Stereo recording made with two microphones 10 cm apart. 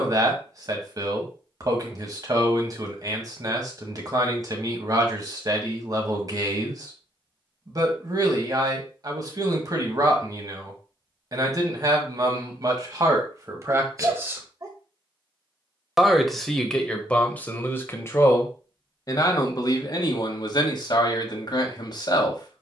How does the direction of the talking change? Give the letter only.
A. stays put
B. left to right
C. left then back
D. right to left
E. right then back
D.